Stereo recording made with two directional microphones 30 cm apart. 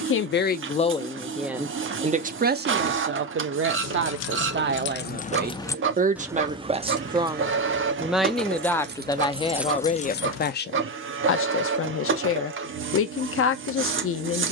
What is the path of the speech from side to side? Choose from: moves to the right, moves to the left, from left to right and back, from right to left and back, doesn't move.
from left to right and back.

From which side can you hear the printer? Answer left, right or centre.
right.